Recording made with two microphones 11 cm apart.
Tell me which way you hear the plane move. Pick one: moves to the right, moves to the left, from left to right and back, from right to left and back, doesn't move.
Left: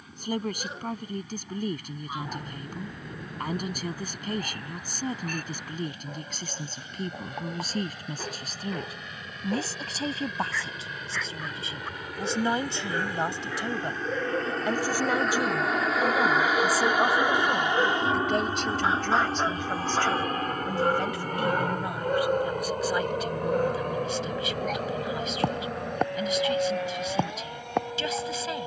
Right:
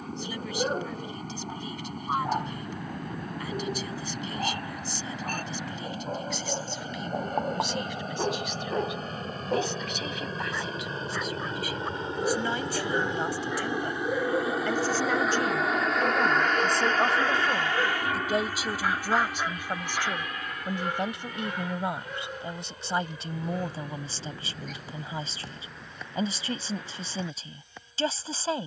moves to the left.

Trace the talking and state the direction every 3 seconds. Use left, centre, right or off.
left, left, left, left, left, centre, centre, right, right, right.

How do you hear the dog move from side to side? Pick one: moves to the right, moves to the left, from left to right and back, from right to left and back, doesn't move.
moves to the left.